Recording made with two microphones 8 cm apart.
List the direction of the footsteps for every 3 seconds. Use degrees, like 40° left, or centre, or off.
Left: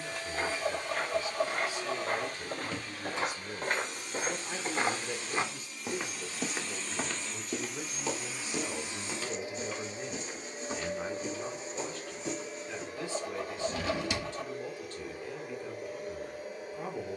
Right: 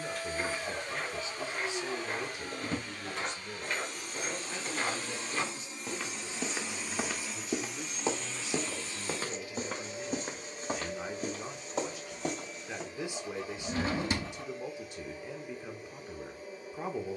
60° left, 40° left, 10° right, 50° right, 60° right, off.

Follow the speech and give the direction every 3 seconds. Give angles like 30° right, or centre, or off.
20° right, 30° left, 50° left, 10° left, 20° right, 20° right.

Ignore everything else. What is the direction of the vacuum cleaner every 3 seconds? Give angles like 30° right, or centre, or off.
50° right, 40° right, centre, 40° left, 60° left, 70° left.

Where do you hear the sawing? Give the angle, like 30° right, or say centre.
60° left.